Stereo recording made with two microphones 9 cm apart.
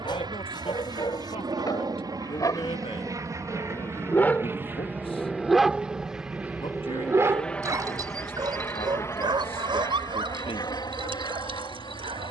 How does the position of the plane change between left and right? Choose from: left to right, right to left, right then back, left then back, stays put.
right to left.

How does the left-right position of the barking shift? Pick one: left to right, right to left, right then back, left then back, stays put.
left to right.